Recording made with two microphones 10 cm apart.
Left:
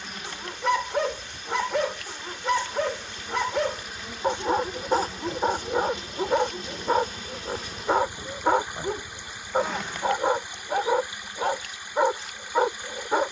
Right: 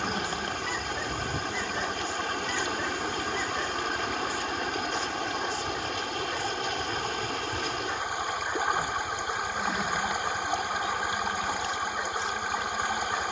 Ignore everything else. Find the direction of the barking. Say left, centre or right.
left.